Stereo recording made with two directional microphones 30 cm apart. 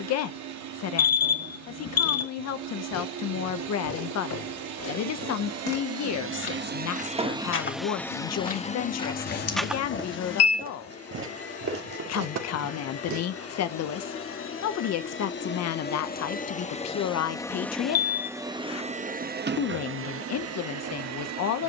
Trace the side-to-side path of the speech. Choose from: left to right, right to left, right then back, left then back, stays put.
stays put.